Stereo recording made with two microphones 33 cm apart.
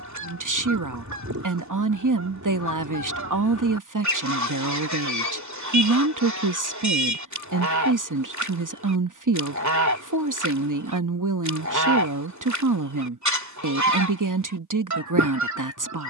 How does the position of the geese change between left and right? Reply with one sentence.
You can hear the geese stay in one place.